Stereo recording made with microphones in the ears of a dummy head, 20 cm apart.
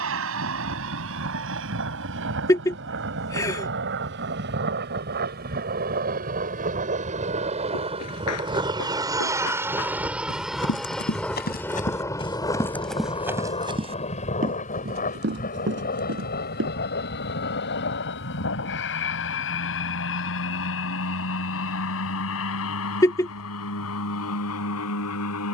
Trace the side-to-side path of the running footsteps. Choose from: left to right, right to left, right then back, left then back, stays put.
left to right.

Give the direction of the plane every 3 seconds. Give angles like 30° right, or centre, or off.
60° right, 50° right, 30° right, centre, 20° left, 40° left, 50° left, 60° left, 60° left.